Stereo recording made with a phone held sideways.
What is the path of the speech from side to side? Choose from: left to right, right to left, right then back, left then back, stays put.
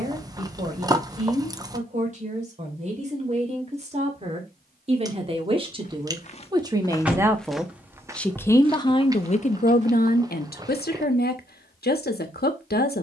right to left.